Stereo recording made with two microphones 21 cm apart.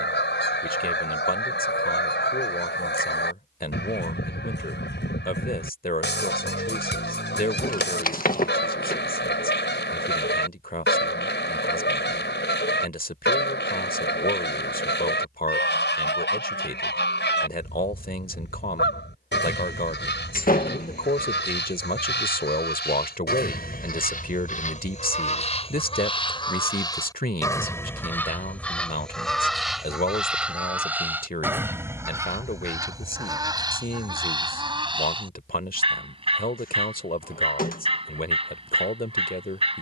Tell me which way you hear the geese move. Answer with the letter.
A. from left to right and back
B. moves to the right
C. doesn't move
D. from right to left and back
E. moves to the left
B.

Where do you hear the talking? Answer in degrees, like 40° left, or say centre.
40° left.